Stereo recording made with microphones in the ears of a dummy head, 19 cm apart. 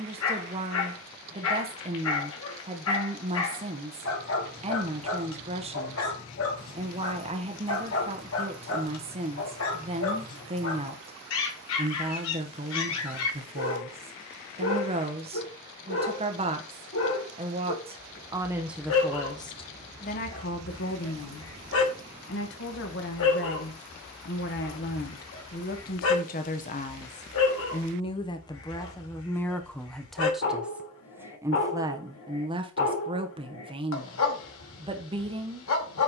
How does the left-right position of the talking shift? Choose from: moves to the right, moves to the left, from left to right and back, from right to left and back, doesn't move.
from right to left and back.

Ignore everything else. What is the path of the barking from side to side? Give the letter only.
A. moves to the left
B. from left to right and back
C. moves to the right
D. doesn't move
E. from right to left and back
D.